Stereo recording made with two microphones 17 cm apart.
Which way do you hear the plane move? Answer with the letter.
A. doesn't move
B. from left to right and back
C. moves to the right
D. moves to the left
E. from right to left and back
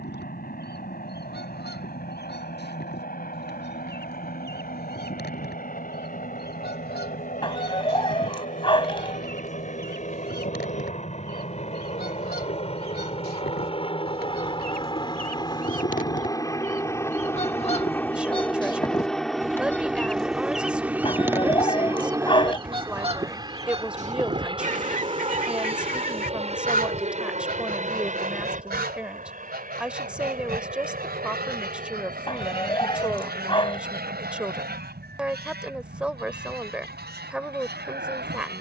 C.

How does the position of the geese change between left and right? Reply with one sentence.
You can hear the geese travel towards the right.